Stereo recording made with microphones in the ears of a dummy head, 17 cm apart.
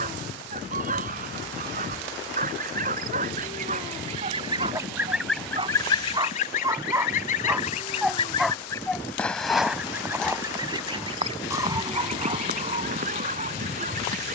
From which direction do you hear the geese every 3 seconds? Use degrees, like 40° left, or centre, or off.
50° right, 20° right, 40° left, 20° right, 50° right.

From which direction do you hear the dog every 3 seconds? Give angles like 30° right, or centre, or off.
50° right, 40° right, 10° right, 10° right, 40° right.